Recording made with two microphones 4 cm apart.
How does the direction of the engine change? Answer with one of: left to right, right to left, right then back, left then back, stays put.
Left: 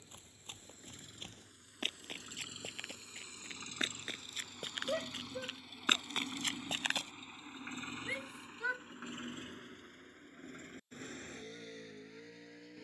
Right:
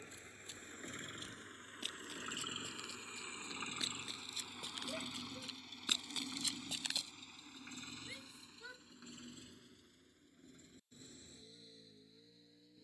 right to left.